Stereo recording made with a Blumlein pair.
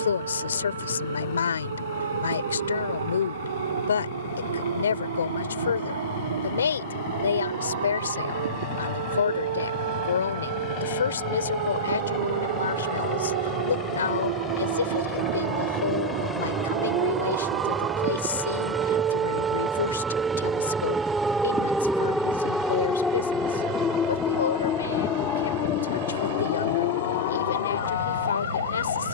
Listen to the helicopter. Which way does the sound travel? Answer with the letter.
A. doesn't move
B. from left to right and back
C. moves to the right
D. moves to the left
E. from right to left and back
C.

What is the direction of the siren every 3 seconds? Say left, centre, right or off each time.
right, right, right, right, right, right, right, centre, left, left.